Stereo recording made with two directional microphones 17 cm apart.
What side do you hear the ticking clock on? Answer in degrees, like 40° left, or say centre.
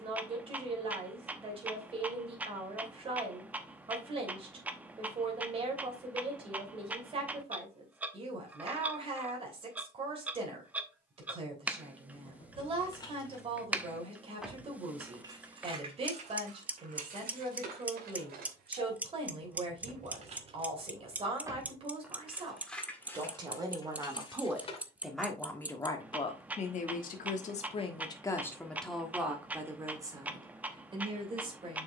10° right.